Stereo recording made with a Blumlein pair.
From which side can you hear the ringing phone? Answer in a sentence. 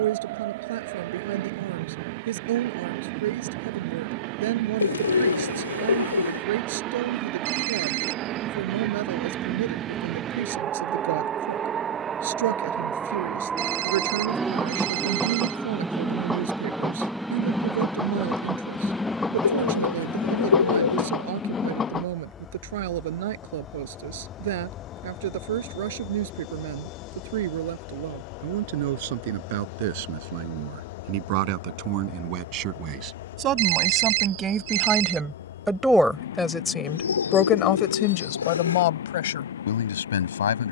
In this clip you hear the ringing phone on the right.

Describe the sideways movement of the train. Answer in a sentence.
You can hear the train move from right to left.